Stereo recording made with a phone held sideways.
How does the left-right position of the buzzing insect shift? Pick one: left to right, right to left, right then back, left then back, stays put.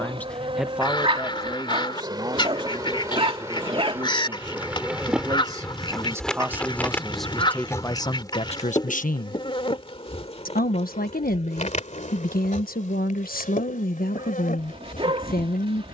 right to left.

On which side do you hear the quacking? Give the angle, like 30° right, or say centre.
30° left.